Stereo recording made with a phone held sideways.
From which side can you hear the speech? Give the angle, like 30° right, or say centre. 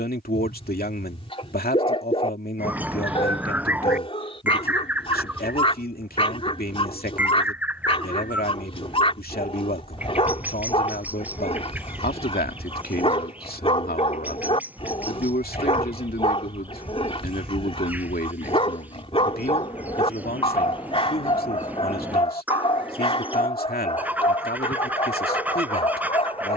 70° left.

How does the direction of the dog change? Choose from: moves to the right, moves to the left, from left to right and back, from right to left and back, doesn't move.
doesn't move.